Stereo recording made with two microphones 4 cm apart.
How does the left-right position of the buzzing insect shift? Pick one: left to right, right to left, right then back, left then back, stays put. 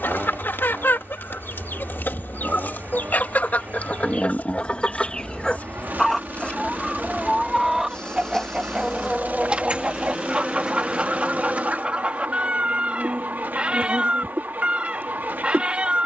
left to right.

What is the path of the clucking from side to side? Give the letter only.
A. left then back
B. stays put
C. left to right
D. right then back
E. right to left
C.